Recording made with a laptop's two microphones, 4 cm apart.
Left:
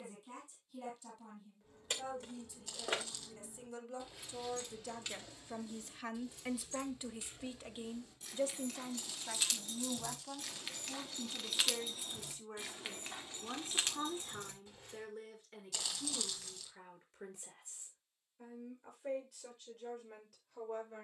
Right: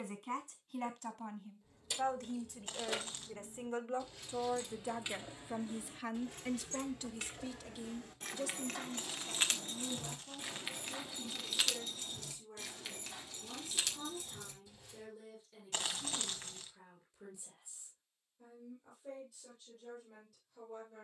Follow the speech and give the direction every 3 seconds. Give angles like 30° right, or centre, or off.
60° right, 30° right, 20° left, 50° left, 60° left, 70° left, 70° left.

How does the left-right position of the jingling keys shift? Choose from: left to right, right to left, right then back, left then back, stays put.
right then back.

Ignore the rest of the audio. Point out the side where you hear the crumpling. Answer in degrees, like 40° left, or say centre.
40° right.